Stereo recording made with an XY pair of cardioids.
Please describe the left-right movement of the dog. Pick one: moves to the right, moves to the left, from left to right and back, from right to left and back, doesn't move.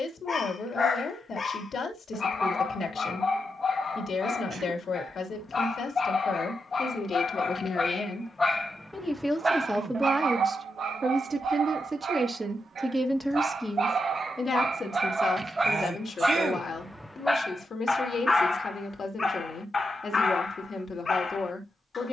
from left to right and back.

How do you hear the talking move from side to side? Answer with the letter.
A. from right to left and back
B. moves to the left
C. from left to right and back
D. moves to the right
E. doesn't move
C.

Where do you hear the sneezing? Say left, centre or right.
right.